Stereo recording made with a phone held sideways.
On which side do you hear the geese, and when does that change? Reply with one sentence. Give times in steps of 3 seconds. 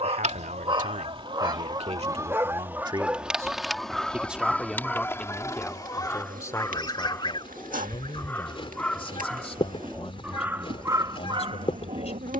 You can hear the geese on the right from 0 s, in the centre from 3 s and on the left from 6 s.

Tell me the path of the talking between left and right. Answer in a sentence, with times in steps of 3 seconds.
In this clip you hear the talking on the right from 0 s, in the centre from 3 s and on the left from 6 s.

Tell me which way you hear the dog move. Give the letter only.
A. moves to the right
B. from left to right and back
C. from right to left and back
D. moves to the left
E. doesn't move
C.